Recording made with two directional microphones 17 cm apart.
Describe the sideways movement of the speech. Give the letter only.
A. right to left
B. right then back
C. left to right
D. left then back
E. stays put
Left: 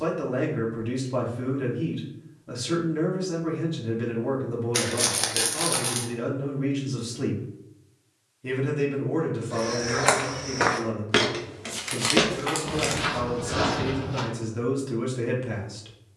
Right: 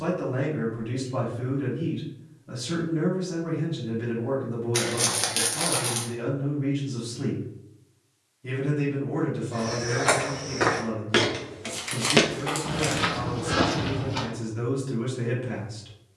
E.